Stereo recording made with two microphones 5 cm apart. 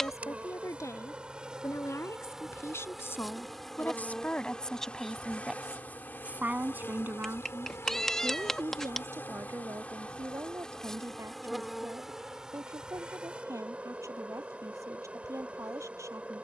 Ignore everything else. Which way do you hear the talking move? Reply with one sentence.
In this clip you hear the talking travel towards the right.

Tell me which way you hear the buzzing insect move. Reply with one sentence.
In this clip you hear the buzzing insect go left and come back.